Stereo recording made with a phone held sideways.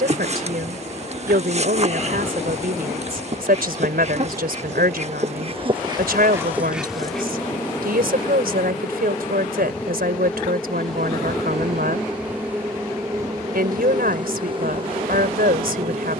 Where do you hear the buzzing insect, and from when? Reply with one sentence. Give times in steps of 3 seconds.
You can hear the buzzing insect on the right from 0 s, in the centre from 6 s and on the right from 12 s.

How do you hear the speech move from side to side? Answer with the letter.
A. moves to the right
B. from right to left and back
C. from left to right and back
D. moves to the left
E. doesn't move
E.